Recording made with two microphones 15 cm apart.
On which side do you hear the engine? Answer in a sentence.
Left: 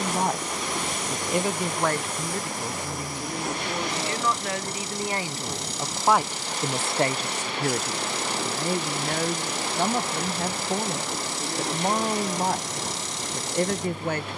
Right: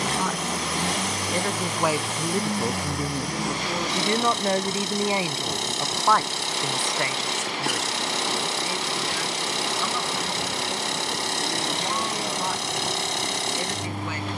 You can hear the engine on the right.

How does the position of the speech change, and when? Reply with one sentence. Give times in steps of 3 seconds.
You can hear the speech in the centre from 0 s, on the right from 3 s and on the left from 6 s.